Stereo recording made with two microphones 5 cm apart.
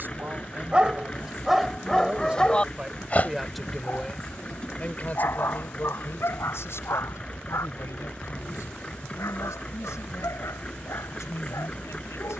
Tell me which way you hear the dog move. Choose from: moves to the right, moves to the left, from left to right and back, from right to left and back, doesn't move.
moves to the left.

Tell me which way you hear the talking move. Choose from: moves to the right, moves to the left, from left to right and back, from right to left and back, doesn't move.
moves to the left.